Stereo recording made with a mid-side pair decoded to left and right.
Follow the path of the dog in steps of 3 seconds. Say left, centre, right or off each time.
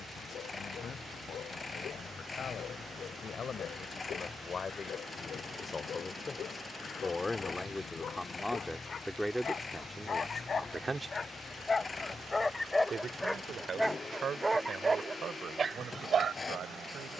left, left, left, left, centre, right.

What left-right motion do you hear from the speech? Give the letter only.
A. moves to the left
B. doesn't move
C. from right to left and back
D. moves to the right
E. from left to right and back
D.